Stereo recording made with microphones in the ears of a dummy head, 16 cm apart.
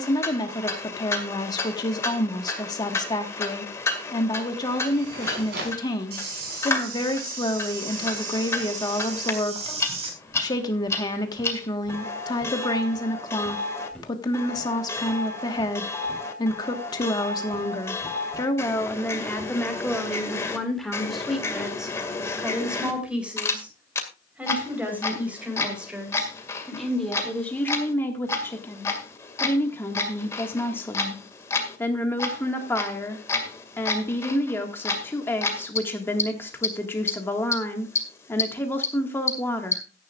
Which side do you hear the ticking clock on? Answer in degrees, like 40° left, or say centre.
20° left.